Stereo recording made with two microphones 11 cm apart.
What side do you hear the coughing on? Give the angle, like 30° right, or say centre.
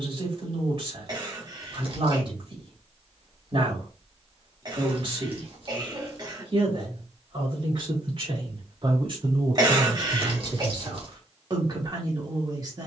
40° right.